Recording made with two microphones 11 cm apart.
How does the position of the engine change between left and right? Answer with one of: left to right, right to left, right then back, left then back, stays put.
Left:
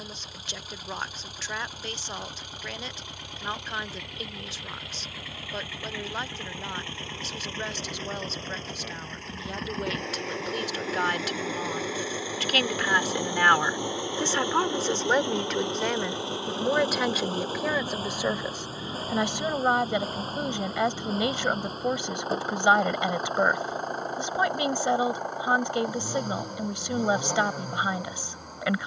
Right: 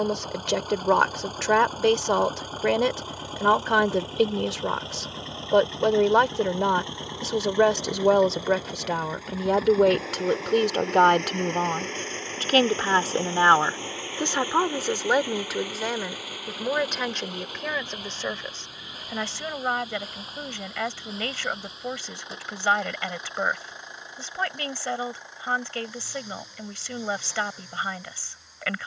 right to left.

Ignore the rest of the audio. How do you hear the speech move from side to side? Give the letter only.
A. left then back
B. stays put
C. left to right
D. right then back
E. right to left
E.